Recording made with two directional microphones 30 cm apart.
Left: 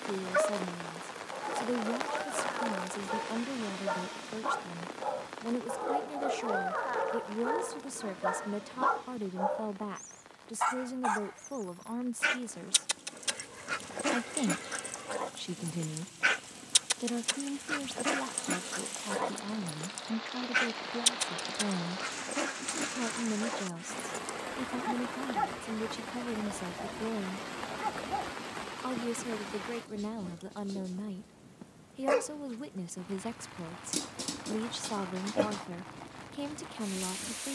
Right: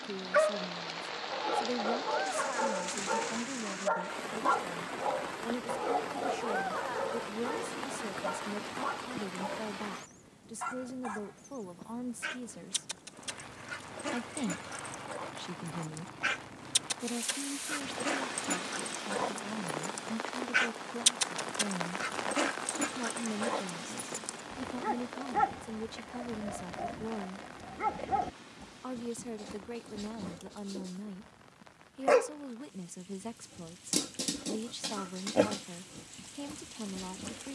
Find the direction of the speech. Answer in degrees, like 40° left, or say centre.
20° left.